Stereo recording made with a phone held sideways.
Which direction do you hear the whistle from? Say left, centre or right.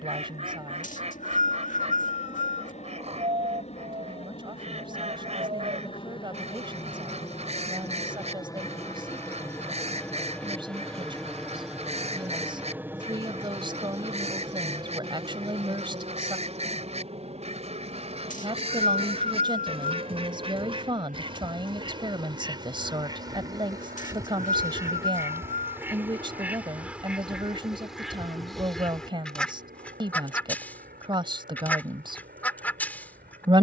left.